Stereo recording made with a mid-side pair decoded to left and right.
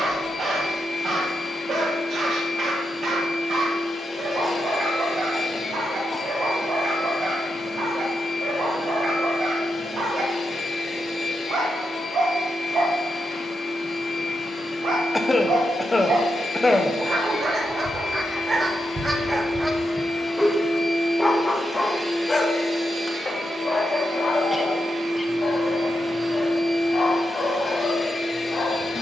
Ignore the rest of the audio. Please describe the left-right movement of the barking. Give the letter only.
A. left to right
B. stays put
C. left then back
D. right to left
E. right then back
D.